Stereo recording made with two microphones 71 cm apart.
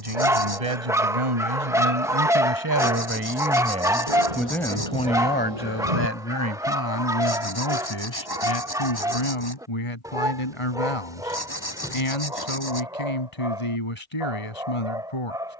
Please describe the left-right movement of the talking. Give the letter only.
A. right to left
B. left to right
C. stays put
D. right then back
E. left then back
A.